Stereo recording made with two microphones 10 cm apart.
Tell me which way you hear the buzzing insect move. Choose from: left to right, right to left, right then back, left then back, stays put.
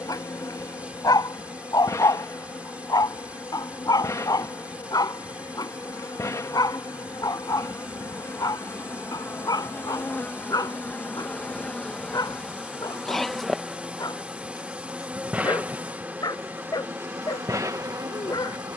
left to right.